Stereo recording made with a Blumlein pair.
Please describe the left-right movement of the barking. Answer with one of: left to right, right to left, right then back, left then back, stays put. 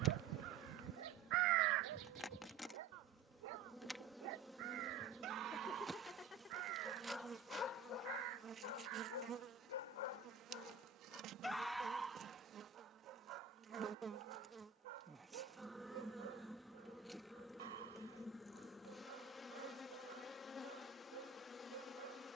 left then back.